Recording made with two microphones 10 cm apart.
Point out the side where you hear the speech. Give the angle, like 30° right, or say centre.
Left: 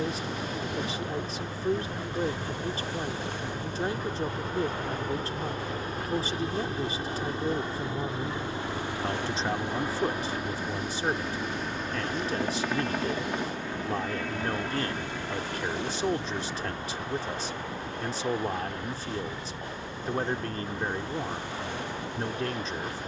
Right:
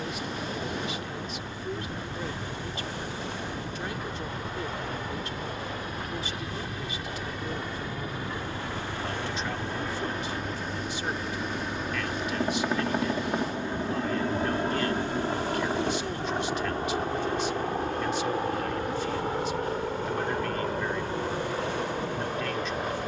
30° left.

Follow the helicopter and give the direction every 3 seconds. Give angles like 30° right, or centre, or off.
50° left, 40° left, 30° left, 10° left, 20° right, 40° right, 50° right, 60° right.